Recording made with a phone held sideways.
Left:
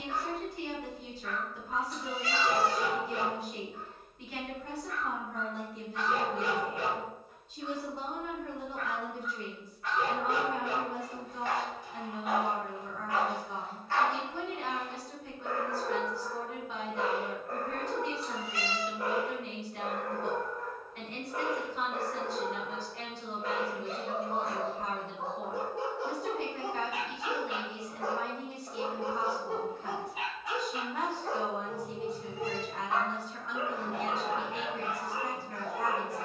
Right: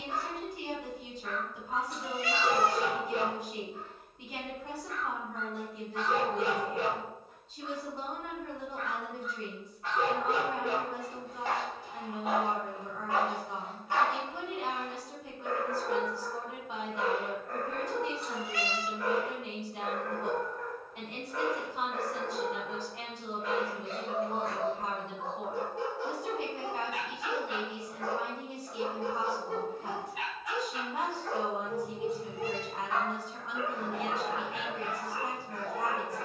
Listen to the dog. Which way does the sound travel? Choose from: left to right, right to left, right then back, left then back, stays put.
right to left.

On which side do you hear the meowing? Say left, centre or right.
right.